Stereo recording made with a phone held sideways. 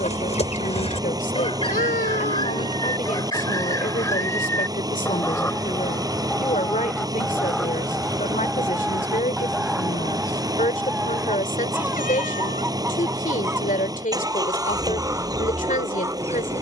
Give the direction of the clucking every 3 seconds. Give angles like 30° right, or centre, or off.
40° left, 20° left, centre, 10° right, 20° right, 20° right.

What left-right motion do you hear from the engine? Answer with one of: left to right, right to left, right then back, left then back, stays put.
stays put.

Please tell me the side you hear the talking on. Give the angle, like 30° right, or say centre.
60° left.